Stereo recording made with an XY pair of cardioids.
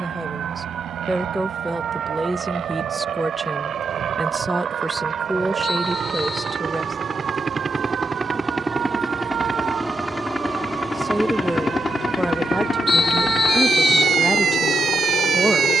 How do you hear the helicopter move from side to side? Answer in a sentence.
You can hear the helicopter go from the right side to the left.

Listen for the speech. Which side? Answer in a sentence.
You can hear the speech in the centre.